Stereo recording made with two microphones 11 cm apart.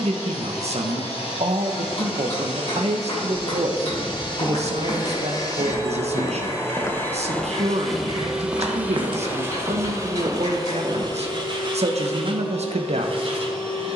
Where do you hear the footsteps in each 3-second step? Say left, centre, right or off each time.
off, left, centre, right, off.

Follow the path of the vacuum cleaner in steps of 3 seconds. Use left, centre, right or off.
left, left, centre, right, right.